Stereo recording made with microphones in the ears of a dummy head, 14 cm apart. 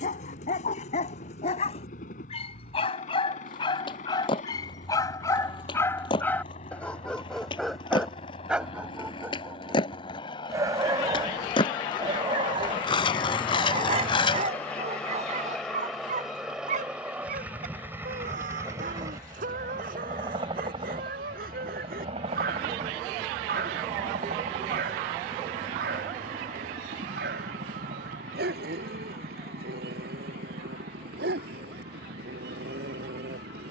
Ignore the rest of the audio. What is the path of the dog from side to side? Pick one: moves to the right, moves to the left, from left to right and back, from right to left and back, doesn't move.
moves to the right.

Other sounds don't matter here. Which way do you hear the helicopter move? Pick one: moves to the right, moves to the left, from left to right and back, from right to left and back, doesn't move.
moves to the right.